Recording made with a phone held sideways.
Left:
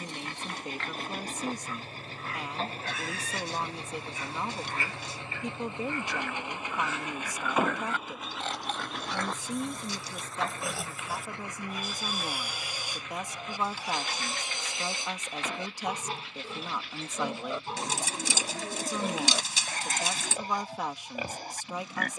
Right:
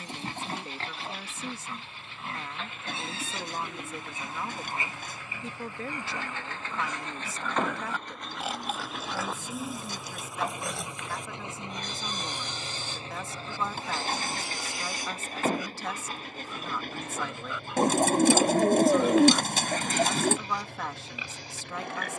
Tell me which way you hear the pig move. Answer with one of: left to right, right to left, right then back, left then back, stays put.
right to left.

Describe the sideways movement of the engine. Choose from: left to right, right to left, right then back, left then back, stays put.
left to right.